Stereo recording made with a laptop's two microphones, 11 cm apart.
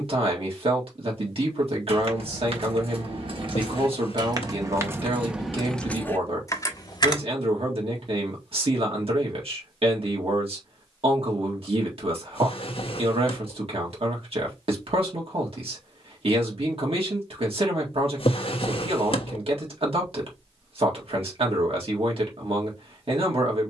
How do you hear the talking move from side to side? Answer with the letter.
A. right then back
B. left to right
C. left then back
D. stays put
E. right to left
D.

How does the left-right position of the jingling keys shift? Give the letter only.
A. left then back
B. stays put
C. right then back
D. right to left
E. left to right
D.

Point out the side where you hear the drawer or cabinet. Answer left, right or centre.
left.